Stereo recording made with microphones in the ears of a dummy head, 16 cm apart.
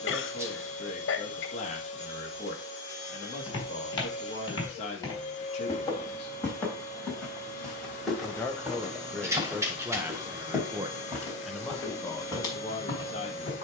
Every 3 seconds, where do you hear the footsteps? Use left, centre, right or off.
off, left, centre, centre, left.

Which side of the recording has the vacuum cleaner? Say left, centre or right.
left.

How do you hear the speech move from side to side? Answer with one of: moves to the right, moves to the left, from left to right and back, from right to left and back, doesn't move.
from left to right and back.